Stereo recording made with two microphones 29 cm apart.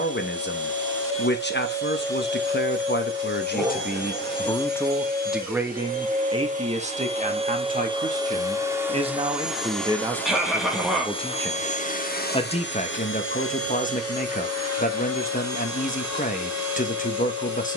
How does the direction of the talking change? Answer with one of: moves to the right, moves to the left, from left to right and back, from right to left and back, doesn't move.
from left to right and back.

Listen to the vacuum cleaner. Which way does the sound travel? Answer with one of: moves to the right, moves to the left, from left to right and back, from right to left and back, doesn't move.
moves to the left.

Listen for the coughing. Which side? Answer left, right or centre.
centre.